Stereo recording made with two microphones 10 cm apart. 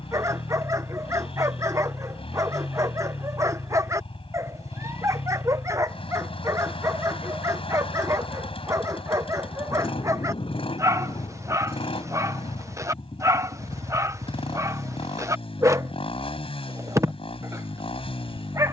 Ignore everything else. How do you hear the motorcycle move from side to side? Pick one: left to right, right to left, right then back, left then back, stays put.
stays put.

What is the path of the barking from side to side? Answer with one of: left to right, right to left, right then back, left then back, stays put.
stays put.